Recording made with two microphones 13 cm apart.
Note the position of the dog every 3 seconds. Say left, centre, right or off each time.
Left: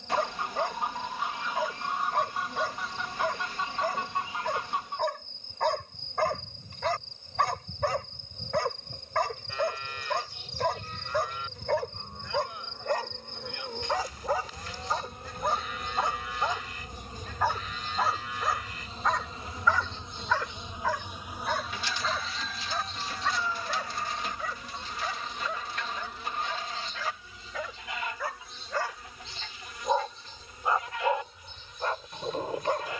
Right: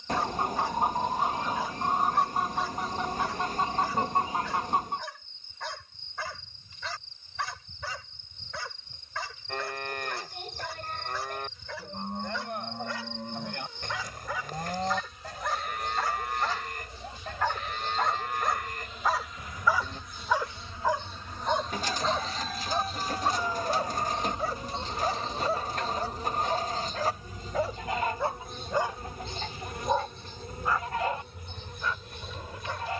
left, left, left, left, left, left, centre, right, right, right, left.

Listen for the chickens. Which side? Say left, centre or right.
right.